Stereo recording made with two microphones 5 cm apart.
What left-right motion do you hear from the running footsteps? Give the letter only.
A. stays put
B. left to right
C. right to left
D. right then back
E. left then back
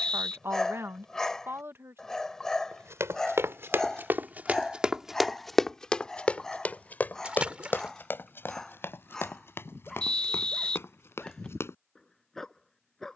C.